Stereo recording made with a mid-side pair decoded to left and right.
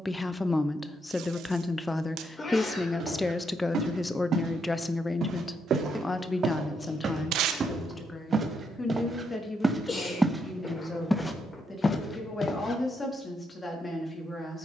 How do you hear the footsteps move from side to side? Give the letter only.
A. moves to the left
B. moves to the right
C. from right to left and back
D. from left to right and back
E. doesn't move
A.